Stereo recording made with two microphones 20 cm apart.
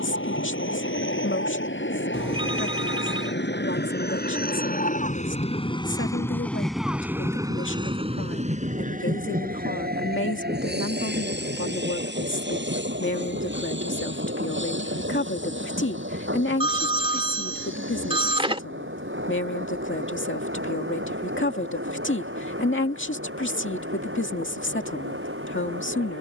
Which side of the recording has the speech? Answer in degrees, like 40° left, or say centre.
70° left.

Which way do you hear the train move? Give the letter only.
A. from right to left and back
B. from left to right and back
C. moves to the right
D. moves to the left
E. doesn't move
C.